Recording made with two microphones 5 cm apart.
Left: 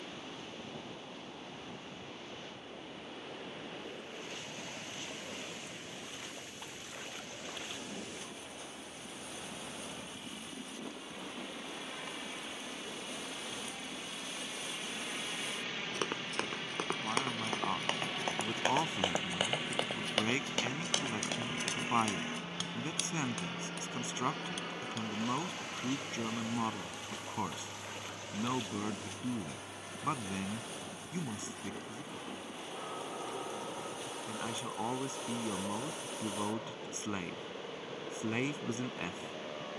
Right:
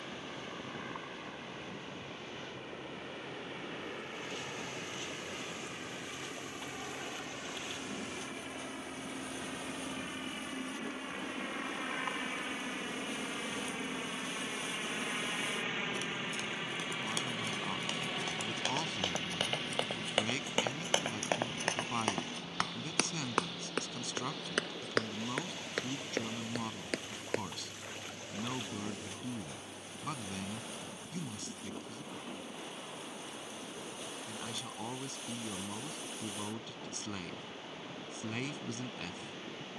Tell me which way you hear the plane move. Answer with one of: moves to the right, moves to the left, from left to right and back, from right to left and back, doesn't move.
moves to the left.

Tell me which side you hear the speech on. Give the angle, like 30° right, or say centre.
20° left.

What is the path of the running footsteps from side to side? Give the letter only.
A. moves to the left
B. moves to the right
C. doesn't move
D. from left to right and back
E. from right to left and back
B.